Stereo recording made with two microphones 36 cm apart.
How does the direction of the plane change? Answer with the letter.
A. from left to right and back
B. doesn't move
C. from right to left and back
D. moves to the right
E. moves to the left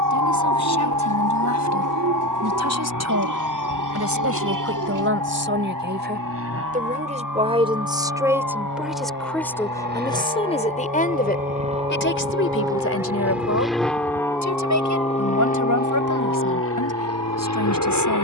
E.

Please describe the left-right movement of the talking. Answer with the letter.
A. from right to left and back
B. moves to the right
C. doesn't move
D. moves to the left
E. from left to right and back
D.